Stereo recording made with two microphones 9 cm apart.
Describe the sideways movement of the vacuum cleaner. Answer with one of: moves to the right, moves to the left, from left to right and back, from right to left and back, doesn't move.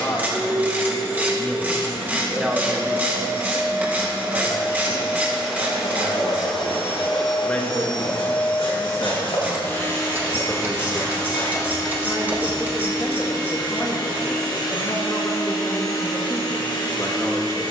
moves to the left.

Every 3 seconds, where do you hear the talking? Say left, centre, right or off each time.
centre, right, centre, left, left, left.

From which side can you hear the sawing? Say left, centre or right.
left.